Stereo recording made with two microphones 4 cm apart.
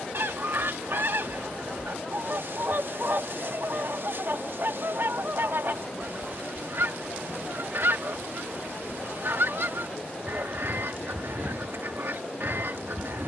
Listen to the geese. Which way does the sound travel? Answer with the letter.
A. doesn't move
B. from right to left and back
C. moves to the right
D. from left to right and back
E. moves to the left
A.